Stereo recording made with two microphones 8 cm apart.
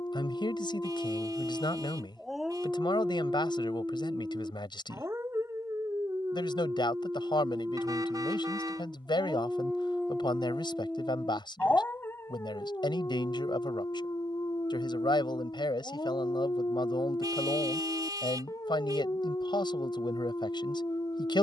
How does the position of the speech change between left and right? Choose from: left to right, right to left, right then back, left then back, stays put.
stays put.